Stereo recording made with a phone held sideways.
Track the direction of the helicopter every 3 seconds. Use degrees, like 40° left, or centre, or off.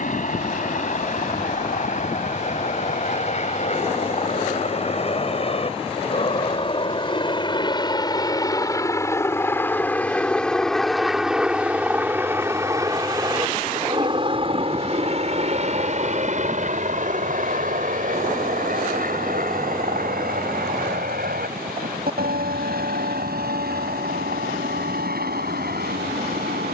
50° left, 50° left, 30° left, centre, 30° right, 50° right, 60° right, 70° right, 80° right.